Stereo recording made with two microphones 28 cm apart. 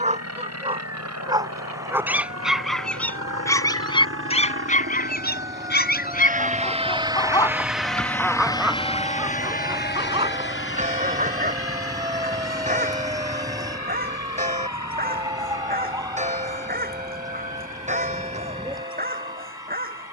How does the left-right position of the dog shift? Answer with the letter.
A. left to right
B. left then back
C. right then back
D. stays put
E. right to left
B.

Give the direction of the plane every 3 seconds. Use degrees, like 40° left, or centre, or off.
70° right, 50° right, 10° right, 40° left, 60° left, 70° left, 70° left.